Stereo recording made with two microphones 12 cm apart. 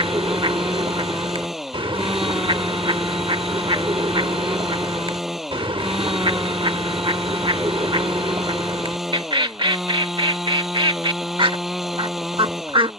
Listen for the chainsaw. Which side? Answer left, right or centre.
centre.